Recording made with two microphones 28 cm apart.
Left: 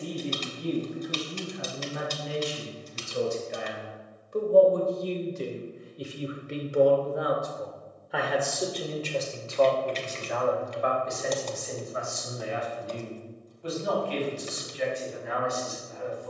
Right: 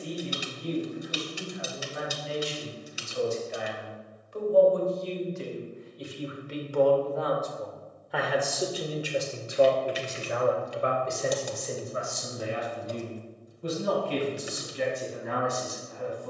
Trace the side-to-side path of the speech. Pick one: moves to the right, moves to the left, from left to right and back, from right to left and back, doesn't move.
moves to the right.